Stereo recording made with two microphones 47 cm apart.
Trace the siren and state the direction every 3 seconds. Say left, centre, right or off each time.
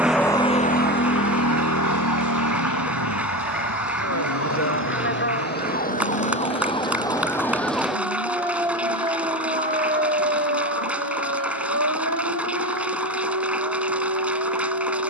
left, left, centre, right, right.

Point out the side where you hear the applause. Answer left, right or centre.
centre.